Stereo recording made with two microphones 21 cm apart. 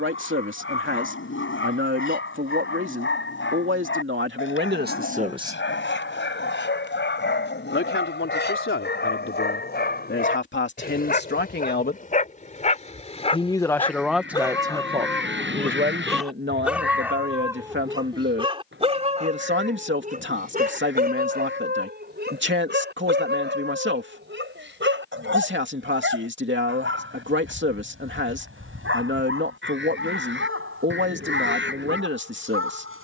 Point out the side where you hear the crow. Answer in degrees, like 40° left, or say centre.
60° right.